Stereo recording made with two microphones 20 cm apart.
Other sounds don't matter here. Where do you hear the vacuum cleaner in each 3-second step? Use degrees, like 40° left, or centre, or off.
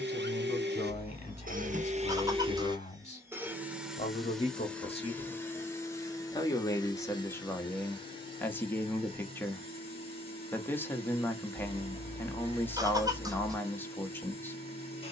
40° right, centre, 20° left, 30° left, 30° left.